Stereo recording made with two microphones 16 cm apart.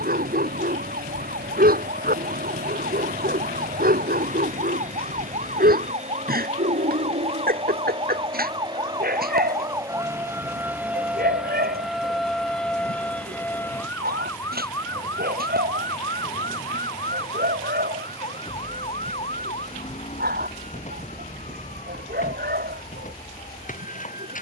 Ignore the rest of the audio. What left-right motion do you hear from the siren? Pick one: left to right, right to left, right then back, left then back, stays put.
right to left.